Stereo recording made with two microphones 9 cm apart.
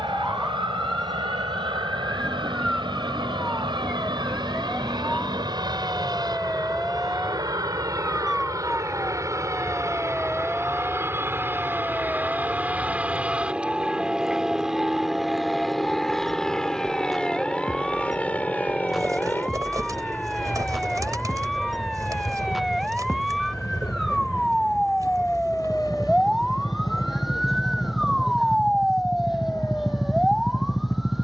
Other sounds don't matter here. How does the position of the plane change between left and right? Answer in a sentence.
In this clip you hear the plane move to the left.